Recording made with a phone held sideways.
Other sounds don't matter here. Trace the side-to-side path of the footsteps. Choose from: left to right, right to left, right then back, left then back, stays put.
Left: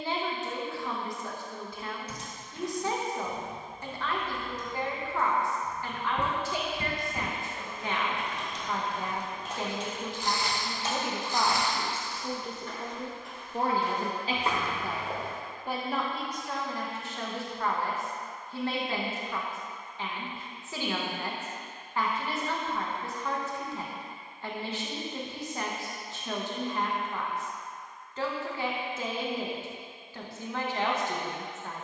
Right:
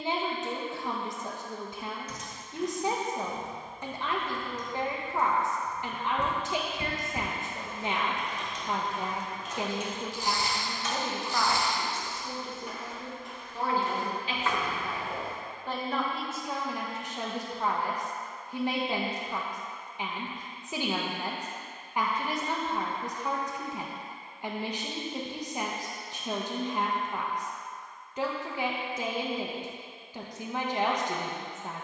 right then back.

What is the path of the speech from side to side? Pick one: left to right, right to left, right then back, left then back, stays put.
left then back.